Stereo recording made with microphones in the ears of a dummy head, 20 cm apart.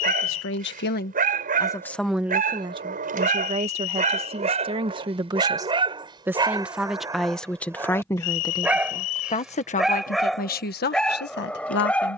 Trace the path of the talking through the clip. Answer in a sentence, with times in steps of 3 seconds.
You can hear the talking on the left from 0 s, on the right from 3 s, in the centre from 6 s and on the left from 9 s.